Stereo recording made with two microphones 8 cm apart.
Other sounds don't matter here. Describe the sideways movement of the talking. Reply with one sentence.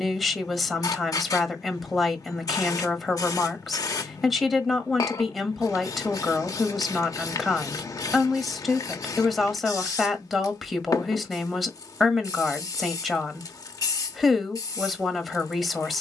In this clip you hear the talking stay in one place.